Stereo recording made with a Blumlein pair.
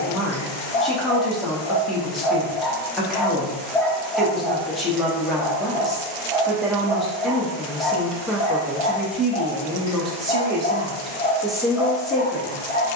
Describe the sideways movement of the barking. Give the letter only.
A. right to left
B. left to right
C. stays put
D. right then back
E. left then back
D.